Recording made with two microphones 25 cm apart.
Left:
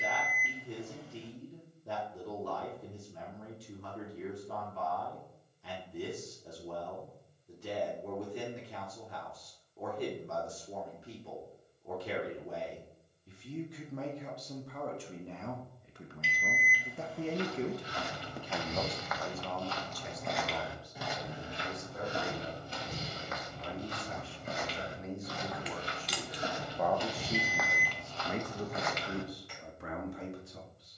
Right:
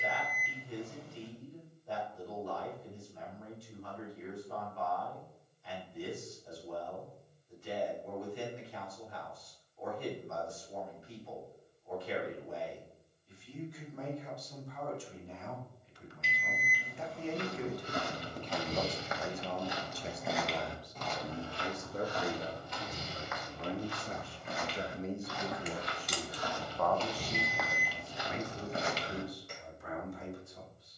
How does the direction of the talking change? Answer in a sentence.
You can hear the talking go right and come back.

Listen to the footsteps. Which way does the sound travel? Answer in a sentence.
In this clip you hear the footsteps move from right to left and back again.